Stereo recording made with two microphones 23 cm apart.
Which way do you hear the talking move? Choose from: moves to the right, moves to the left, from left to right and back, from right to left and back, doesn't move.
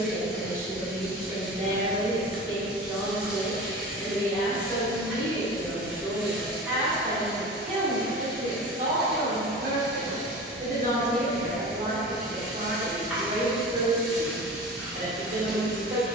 from right to left and back.